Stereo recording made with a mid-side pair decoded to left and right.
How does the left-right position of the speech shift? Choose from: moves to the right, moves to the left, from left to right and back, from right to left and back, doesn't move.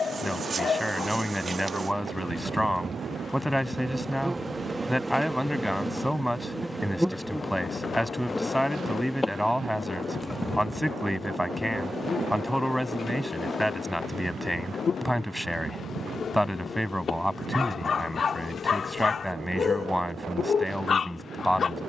doesn't move.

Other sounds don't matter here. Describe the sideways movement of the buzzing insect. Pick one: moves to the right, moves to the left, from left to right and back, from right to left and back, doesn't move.
moves to the left.